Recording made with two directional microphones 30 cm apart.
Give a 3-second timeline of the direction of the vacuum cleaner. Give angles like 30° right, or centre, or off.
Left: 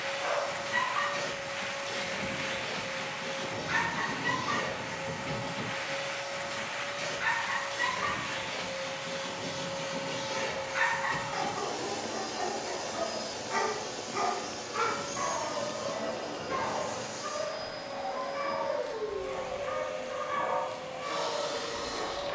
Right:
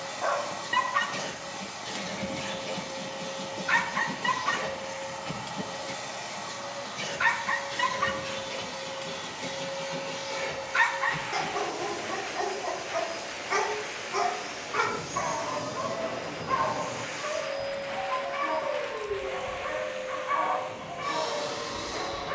40° right, 40° right, 40° right, 10° right, 20° left, 10° right, 30° right, 40° right.